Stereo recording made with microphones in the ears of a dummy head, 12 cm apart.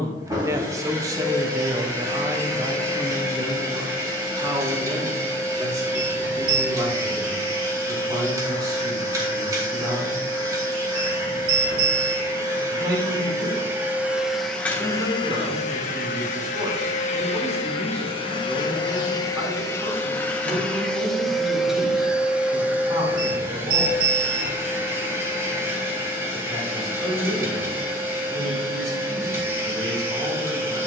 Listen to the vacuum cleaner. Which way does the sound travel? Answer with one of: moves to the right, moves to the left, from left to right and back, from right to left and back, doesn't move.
from right to left and back.